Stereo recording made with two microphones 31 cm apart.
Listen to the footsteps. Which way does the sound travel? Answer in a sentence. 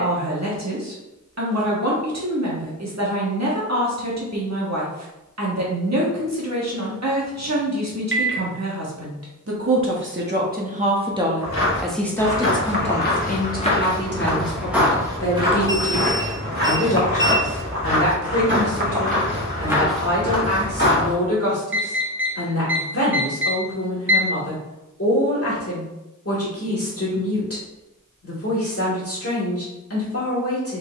You can hear the footsteps move from left to right and back again.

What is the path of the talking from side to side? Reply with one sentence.
You can hear the talking move from right to left.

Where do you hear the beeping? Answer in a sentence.
You can hear the beeping on the right.